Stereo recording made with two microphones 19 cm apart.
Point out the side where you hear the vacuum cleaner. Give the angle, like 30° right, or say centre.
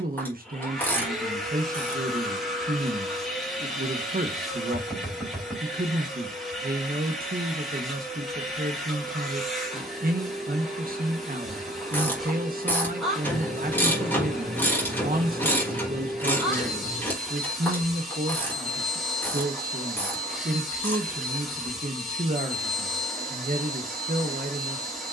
centre.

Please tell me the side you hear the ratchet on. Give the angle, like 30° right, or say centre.
10° left.